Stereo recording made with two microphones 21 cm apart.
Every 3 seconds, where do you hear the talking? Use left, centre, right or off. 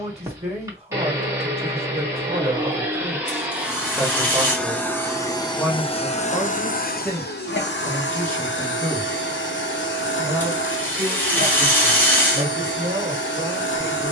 right, centre, centre, centre, right.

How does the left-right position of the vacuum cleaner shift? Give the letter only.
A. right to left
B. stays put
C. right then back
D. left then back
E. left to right
A.